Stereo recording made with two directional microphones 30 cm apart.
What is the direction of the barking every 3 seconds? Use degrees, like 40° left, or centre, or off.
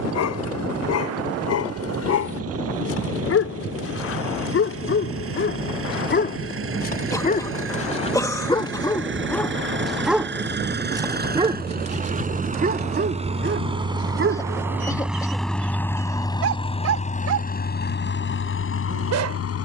60° left, 50° left, 30° left, 10° right, 40° right, 60° right, 70° right.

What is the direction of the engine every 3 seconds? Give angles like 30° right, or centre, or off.
50° right, 50° right, 50° right, 40° right, 20° right, 20° left, 50° left.